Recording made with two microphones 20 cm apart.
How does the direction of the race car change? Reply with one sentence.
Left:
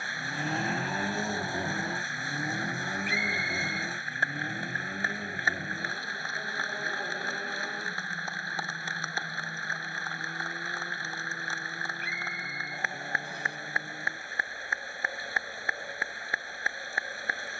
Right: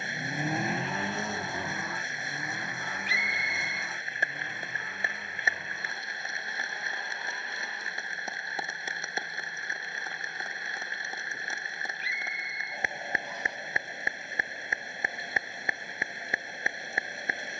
You can hear the race car move from right to left.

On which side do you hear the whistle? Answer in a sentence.
In this clip you hear the whistle on the left.